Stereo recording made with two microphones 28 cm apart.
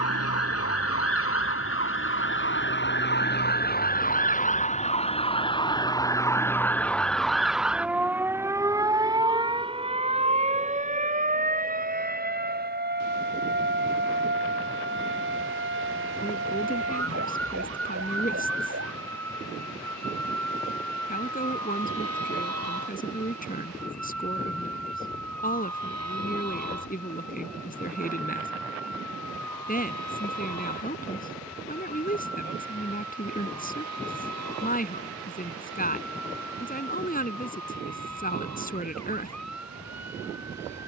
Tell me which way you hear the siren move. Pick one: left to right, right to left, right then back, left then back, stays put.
left to right.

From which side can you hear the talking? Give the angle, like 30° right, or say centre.
30° left.